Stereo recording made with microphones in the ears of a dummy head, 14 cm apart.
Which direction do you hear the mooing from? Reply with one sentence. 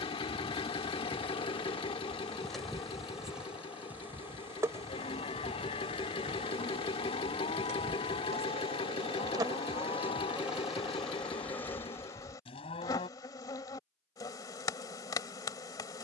You can hear the mooing on the left.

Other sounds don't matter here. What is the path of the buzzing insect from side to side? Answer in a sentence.
In this clip you hear the buzzing insect go right and come back.